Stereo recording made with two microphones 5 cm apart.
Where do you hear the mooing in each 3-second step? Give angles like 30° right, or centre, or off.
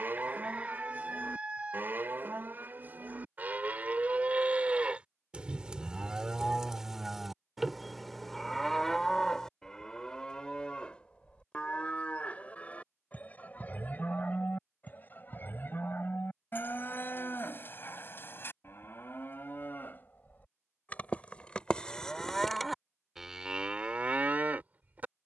40° right, 30° right, centre, 20° left, 30° left, 40° left, 40° left, centre, 30° right.